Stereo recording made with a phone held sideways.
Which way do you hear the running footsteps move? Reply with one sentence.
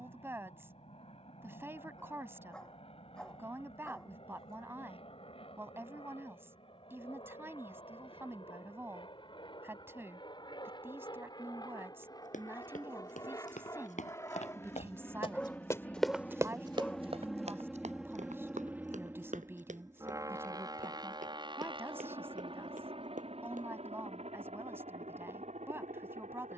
You can hear the running footsteps travel towards the right.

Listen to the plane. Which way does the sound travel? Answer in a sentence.
In this clip you hear the plane move from left to right.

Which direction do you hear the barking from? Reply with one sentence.
You can hear the barking in the centre.